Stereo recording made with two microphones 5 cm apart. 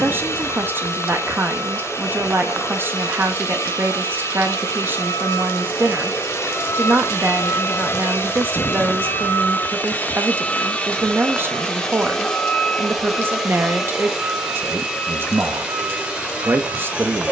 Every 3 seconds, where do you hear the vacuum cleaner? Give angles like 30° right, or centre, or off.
70° left, 70° left, 60° left, 30° left, centre, 20° right.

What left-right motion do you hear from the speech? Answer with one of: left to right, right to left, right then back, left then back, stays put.
stays put.